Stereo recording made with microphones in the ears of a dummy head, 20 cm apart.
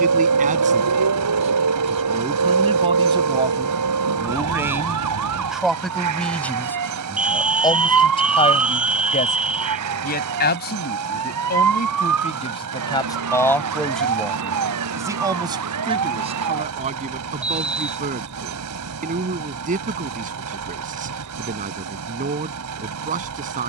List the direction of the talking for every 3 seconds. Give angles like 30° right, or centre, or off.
30° right, 10° right, 20° left, 40° left, 10° left, 30° right, 40° right, 40° right.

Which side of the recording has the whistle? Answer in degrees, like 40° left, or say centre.
10° right.